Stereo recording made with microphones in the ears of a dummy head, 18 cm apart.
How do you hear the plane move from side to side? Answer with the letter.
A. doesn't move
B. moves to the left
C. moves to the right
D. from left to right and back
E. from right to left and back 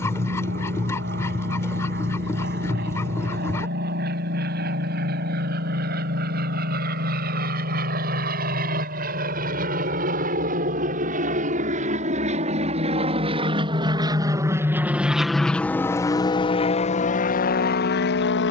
B.